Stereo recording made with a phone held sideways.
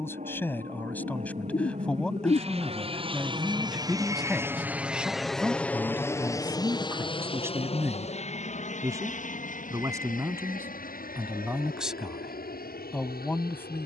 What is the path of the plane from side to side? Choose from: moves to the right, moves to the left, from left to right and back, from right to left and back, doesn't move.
moves to the left.